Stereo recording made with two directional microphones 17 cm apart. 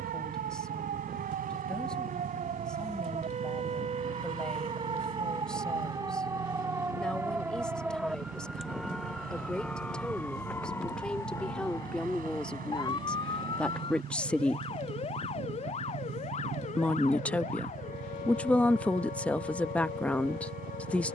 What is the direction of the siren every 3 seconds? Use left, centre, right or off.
right, right, centre, centre, left, left, left.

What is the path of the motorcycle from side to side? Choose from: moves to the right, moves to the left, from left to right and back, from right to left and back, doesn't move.
doesn't move.